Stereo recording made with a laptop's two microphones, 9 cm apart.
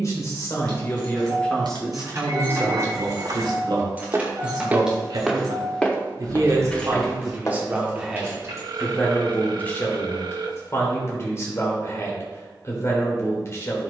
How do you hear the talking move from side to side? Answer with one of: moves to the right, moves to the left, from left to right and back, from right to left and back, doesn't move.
from left to right and back.